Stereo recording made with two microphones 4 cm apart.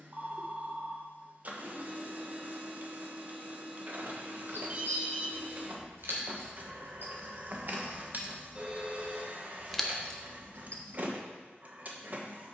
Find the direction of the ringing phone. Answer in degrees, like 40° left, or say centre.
30° right.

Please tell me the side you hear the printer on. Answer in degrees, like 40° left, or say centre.
40° right.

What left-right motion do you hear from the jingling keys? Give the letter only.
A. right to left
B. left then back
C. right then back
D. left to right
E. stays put
A.